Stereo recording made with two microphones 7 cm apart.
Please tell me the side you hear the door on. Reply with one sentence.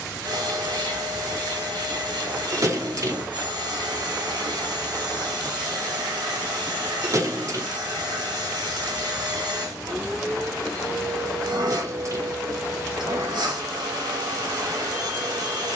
You can hear the door on the right.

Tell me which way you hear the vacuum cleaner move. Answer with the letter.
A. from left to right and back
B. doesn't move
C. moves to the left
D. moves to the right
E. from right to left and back
B.